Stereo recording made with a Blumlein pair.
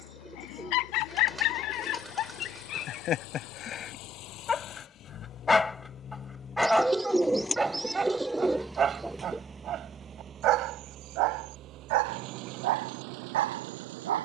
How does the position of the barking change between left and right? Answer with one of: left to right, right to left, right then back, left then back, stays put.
left to right.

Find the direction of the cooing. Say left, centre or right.
centre.